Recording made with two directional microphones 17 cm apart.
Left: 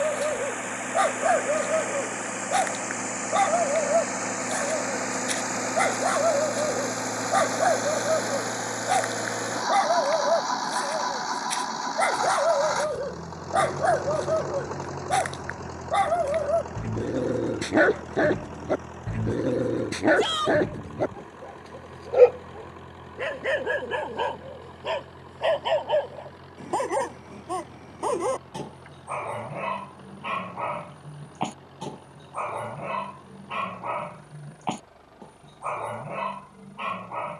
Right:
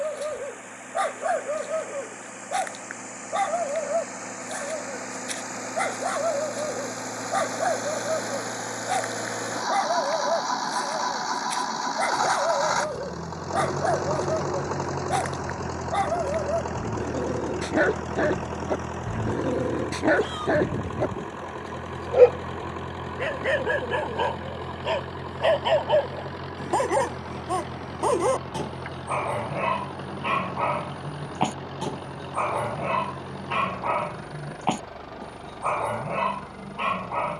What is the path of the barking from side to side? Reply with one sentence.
You can hear the barking travel towards the right.